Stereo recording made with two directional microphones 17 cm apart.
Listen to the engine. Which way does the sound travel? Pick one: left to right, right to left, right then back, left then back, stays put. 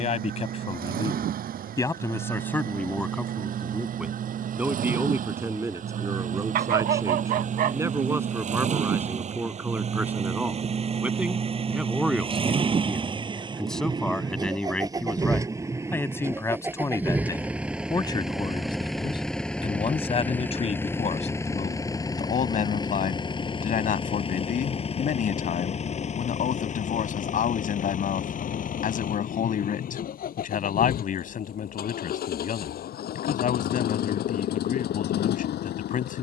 right to left.